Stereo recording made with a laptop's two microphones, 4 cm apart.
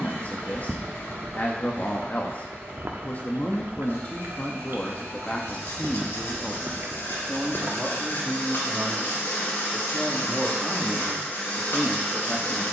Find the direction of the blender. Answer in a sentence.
In this clip you hear the blender on the left.